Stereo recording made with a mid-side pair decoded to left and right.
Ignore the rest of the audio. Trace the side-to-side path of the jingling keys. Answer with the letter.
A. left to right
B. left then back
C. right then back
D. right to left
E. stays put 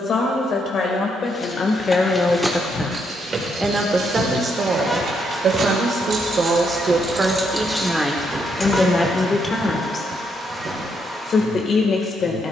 C.